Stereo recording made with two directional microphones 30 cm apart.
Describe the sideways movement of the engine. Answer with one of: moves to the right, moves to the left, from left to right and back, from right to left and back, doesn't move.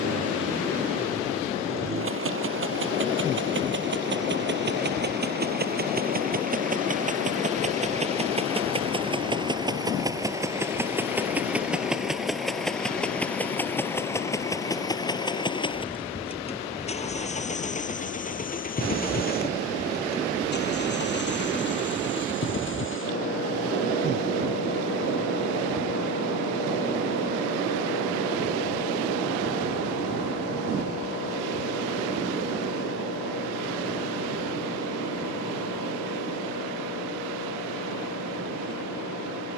moves to the left.